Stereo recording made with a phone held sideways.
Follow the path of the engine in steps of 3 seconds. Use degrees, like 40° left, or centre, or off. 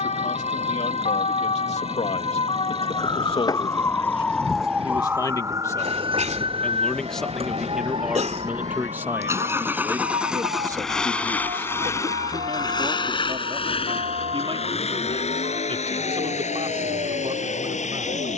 60° right, 60° right, 40° right, centre, 50° left, 70° left.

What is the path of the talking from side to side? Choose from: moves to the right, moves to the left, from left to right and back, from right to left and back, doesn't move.
moves to the right.